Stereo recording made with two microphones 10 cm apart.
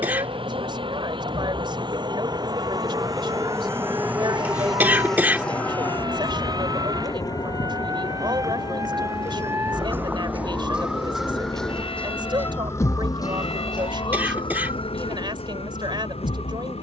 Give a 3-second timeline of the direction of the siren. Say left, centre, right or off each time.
right, right, right, centre, left, left.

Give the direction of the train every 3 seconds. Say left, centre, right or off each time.
right, centre, left, left, left, left.